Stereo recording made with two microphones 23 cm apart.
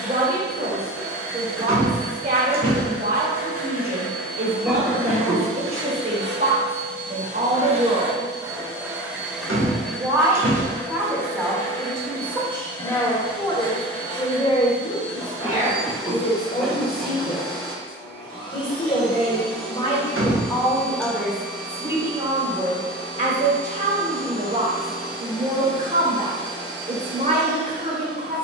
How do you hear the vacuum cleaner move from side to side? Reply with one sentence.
In this clip you hear the vacuum cleaner travel towards the left.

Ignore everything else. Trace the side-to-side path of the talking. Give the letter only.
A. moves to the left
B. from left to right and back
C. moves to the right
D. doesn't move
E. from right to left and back
E.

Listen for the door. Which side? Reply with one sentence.
In this clip you hear the door on the right.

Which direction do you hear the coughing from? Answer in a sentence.
In this clip you hear the coughing in the centre.